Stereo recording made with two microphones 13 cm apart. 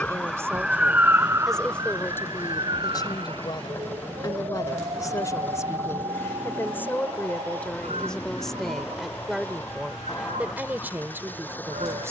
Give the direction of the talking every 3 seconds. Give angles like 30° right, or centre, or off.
centre, 30° left, 10° left, 10° right.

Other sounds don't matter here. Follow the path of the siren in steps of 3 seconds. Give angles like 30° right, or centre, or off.
20° right, 50° right, 50° right, 60° right.